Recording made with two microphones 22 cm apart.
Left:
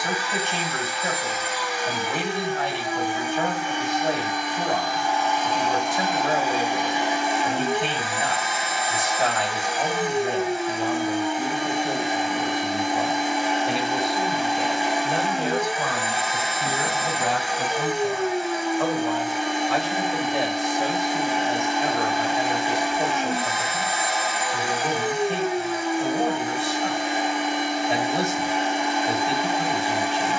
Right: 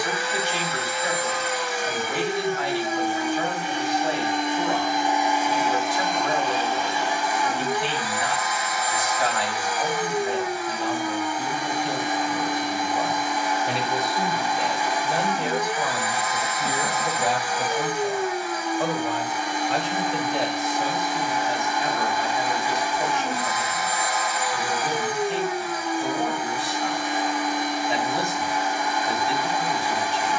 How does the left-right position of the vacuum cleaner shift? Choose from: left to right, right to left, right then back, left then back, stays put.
right to left.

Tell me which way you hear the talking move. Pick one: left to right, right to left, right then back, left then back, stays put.
right then back.